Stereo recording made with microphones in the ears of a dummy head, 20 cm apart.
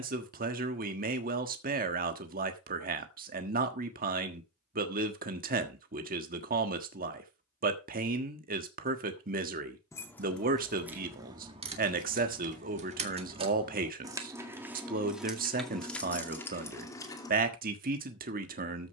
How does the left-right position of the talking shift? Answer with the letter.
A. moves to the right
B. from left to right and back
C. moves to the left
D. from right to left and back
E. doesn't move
E.